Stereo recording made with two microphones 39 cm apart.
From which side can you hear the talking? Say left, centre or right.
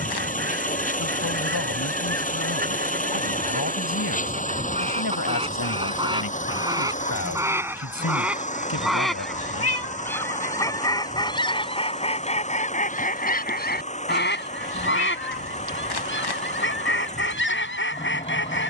left.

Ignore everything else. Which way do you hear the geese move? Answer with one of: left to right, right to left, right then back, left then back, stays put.
right to left.